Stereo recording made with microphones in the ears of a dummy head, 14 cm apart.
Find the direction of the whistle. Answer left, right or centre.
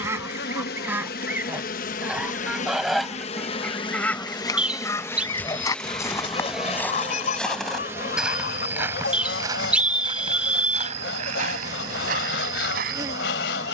centre.